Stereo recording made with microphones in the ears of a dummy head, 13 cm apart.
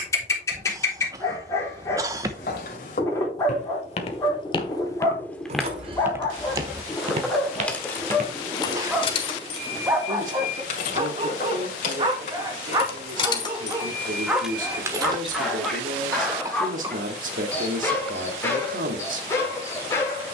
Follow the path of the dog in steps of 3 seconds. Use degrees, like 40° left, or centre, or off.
20° left, 20° left, 10° left, 20° right, 20° right, 10° left, 20° left.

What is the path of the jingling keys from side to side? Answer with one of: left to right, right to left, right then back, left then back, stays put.
left then back.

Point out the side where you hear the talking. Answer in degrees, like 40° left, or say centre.
60° right.